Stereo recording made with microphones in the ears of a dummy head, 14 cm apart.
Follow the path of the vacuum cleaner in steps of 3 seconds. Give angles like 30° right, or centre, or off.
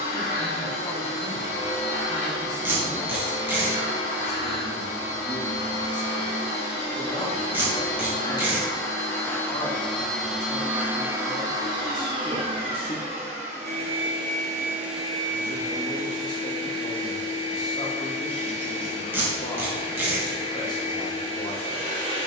40° left, 40° left, 30° left, 10° right, 30° right, 30° left, 40° left, 40° left.